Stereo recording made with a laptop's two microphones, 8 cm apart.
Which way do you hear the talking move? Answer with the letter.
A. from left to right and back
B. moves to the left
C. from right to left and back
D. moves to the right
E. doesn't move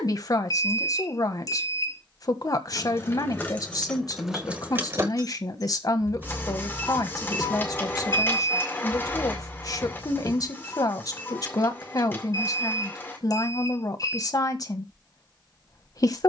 E.